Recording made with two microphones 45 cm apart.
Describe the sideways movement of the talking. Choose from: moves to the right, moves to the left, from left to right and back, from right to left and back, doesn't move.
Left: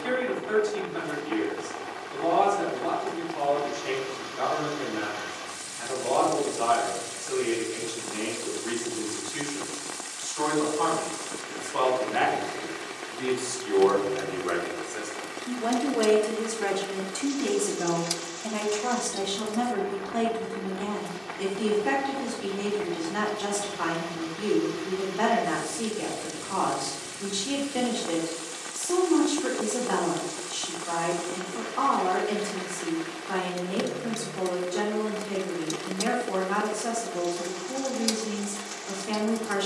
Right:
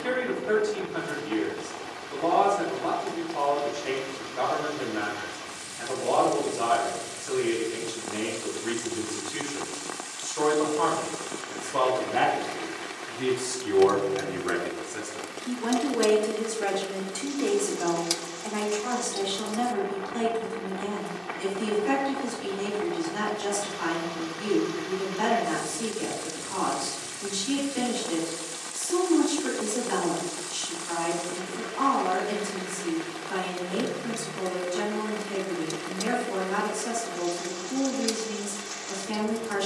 moves to the left.